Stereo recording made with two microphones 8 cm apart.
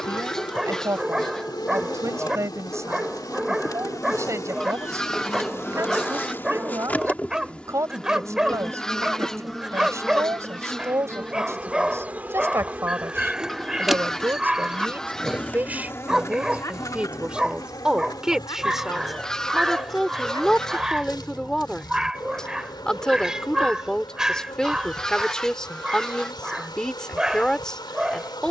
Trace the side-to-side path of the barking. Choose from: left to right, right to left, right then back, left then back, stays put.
stays put.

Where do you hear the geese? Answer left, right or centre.
centre.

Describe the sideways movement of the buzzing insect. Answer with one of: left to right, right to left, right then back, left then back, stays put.
right then back.